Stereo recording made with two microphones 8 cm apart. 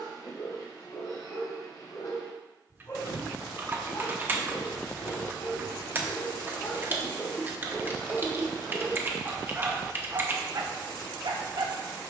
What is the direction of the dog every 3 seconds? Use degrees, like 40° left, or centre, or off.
50° left, 40° left, 20° left, 40° right.